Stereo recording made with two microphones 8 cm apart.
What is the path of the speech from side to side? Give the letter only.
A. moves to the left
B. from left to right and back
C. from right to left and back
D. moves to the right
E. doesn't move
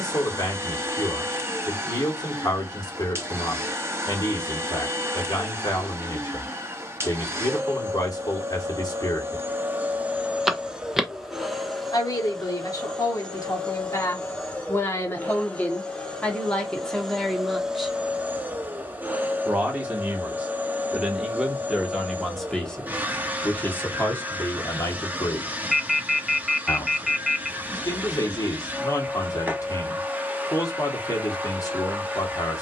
B.